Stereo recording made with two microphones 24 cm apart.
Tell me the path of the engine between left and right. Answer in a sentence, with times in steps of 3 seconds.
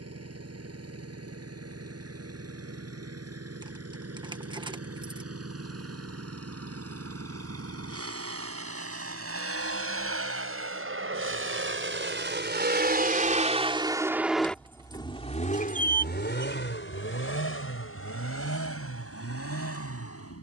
You can hear the engine on the right from 0 s and on the left from 15 s.